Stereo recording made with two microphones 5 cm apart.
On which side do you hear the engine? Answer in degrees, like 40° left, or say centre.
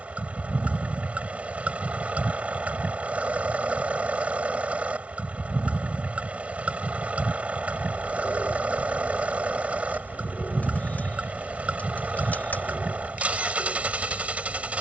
30° right.